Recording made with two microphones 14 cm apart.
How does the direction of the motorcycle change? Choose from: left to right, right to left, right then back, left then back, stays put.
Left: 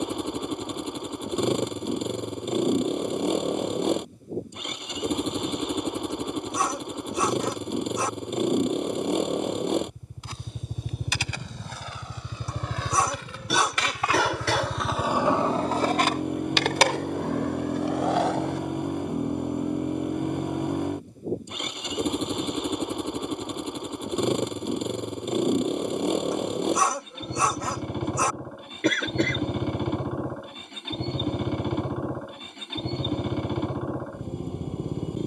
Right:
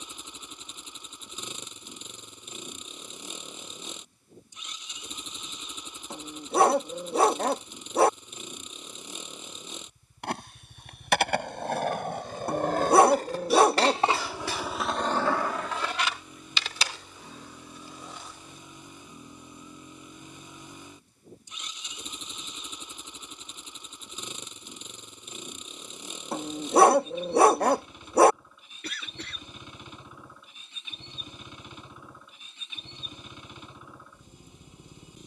stays put.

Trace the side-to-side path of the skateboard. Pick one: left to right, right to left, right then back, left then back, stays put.
right to left.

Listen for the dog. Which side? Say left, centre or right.
right.